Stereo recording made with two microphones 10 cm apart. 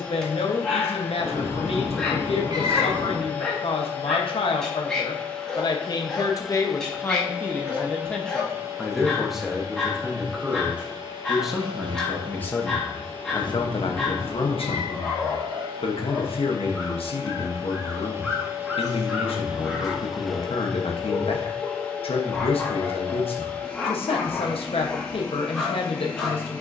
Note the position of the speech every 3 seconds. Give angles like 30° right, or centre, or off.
80° left, 60° left, 20° left, 10° right, 50° left, 70° left, 70° left, 70° left, 70° left.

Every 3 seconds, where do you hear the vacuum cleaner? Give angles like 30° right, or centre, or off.
20° left, 20° left, 10° right, 40° right, 60° right, 40° right, 10° right, 10° left, 10° left.